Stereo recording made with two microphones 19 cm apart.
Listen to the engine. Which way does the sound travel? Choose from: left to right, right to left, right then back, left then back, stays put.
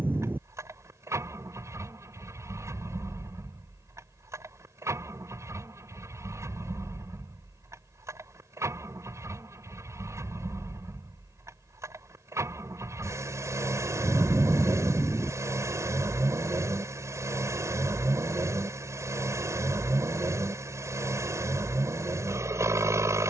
stays put.